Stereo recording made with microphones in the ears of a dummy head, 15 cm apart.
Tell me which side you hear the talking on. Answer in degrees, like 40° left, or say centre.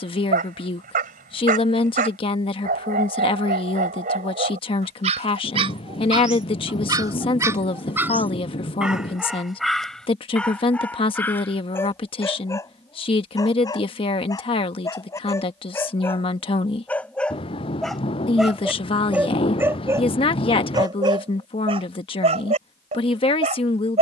30° left.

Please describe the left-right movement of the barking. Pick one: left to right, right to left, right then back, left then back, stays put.
left then back.